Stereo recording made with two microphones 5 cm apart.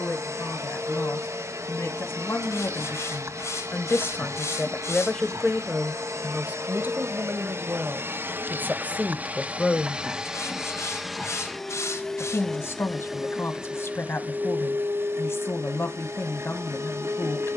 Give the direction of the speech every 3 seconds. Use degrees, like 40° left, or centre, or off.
60° left, 30° left, 40° right, 10° left, 60° left, 60° left.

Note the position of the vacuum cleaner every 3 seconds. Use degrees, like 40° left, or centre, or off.
70° right, 70° right, 60° right, 10° right, 20° right, 60° right.